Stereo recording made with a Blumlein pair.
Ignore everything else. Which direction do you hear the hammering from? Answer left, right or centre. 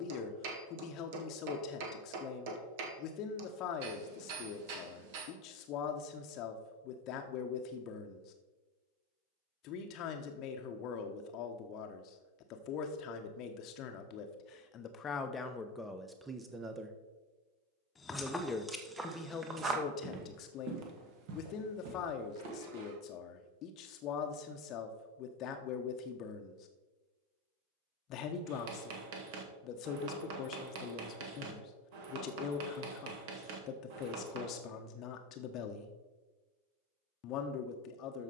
right.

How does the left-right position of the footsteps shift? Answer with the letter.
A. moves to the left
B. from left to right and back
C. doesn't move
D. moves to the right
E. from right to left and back
D.